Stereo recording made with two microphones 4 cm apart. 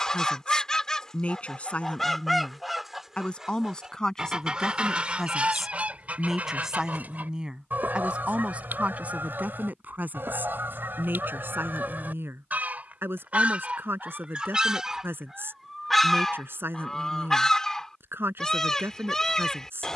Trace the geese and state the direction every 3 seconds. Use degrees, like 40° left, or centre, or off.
10° left, 20° right, 40° right, 50° right, 30° right, 10° left, 10° left.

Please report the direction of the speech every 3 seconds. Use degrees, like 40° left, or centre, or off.
30° left, 10° left, 20° right, 40° right, 60° right, 60° right, 60° right.